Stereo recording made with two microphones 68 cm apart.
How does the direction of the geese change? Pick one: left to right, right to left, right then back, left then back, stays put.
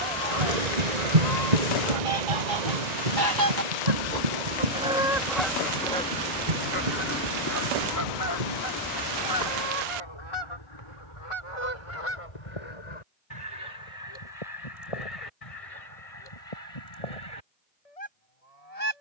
right to left.